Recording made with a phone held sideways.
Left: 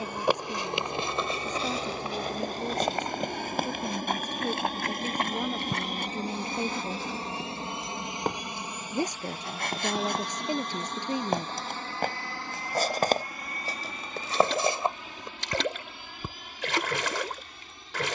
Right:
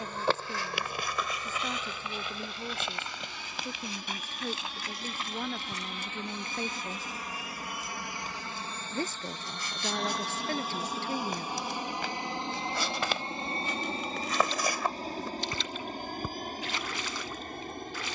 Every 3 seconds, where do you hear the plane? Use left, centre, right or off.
left, left, left, centre, right, right.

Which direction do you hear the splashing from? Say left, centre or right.
left.